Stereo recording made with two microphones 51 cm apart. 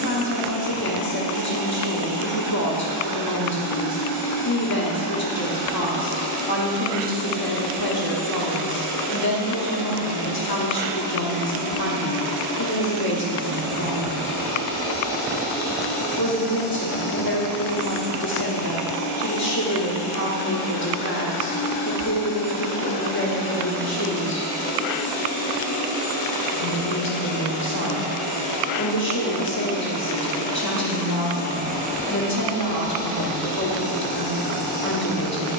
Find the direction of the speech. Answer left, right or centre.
left.